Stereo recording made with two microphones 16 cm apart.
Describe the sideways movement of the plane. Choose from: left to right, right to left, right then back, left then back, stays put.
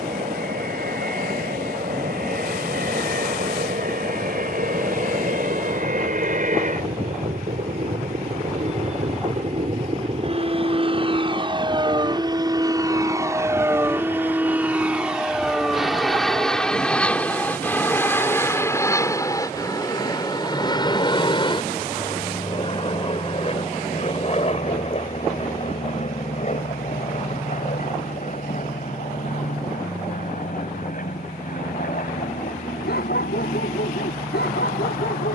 right to left.